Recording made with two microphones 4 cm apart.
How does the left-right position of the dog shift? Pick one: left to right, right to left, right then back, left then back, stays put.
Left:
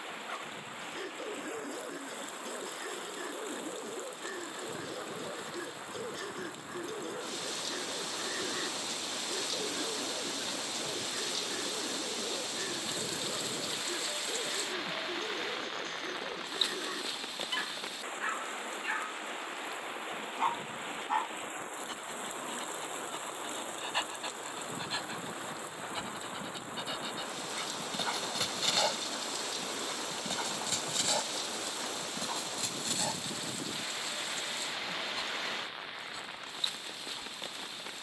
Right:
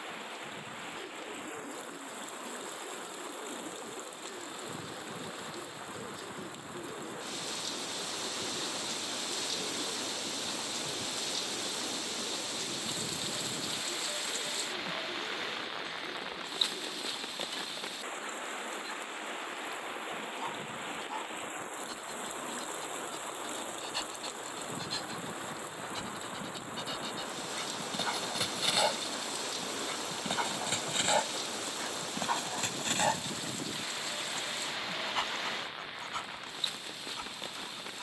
left to right.